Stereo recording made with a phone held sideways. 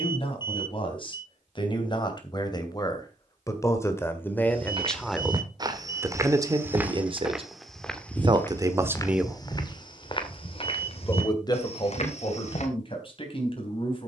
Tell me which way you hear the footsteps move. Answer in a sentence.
You can hear the footsteps travel towards the left.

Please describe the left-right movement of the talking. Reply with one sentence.
You can hear the talking move from left to right and back again.